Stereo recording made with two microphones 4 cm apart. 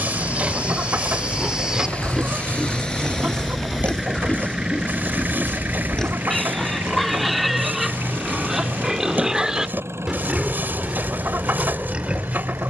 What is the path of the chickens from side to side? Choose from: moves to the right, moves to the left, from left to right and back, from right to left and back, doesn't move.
doesn't move.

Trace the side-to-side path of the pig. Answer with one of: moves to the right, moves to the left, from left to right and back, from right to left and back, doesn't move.
from right to left and back.